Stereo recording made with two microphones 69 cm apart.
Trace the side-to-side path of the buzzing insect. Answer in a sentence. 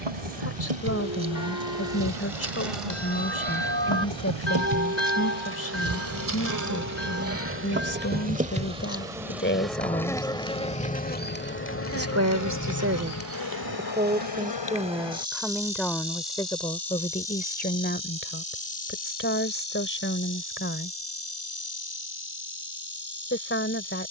In this clip you hear the buzzing insect go from the right side to the left.